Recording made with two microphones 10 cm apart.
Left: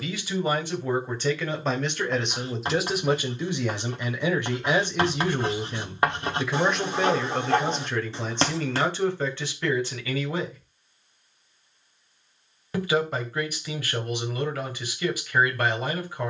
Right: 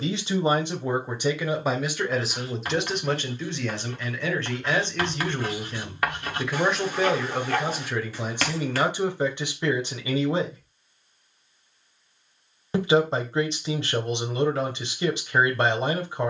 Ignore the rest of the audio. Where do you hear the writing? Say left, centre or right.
left.